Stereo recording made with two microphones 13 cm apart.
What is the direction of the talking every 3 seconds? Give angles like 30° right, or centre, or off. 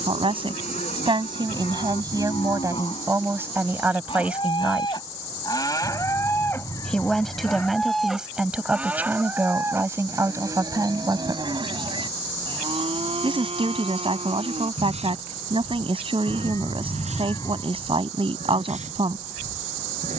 30° right, 10° right, centre, 20° right, 40° right, 40° right, 40° right.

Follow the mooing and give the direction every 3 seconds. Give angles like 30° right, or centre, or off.
60° left, 40° left, 10° left, 30° right, 50° right, 60° right, 70° right.